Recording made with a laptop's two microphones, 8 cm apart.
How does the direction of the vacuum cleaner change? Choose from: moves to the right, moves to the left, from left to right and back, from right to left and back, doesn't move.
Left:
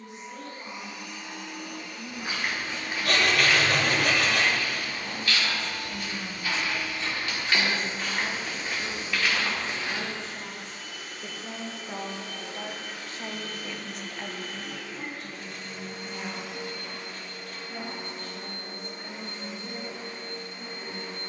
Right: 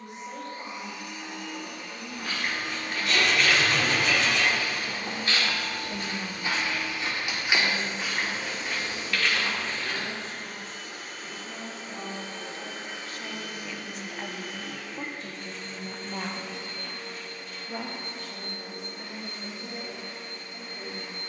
moves to the left.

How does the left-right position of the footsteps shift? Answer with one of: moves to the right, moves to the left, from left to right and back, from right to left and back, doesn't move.
from left to right and back.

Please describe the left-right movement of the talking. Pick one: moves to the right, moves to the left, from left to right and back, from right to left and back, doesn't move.
from right to left and back.